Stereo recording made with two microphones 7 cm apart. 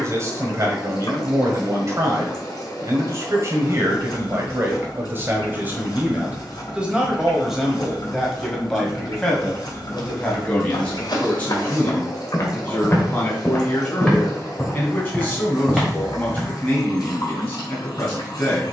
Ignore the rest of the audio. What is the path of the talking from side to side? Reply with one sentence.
You can hear the talking move to the left.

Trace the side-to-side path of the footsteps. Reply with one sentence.
In this clip you hear the footsteps go from the left side to the right.